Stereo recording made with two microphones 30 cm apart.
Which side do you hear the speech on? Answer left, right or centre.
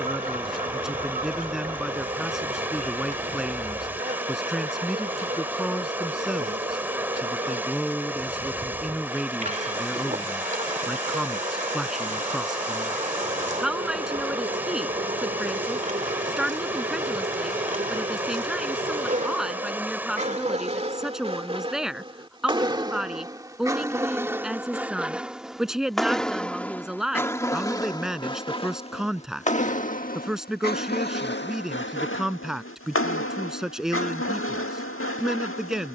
centre.